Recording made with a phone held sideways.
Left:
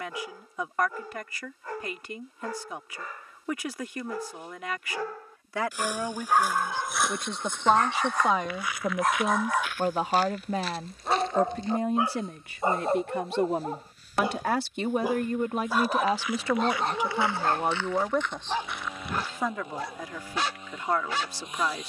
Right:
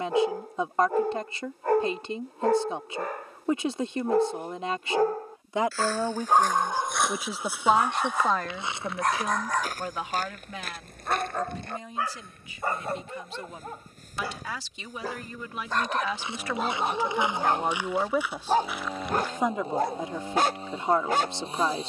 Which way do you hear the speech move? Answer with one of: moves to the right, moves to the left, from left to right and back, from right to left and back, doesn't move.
from right to left and back.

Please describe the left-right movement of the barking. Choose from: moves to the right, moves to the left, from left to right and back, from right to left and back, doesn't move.
from right to left and back.